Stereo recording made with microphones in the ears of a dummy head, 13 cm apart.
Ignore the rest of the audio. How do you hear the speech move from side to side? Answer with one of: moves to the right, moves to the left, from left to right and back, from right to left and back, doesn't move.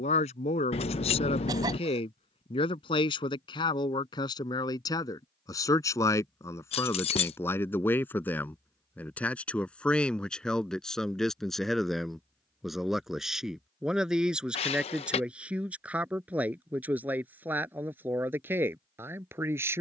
moves to the right.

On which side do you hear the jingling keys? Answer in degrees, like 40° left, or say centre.
40° left.